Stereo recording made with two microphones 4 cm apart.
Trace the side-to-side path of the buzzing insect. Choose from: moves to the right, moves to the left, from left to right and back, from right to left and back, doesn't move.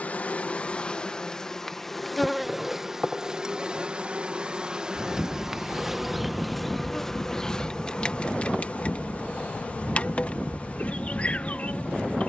from left to right and back.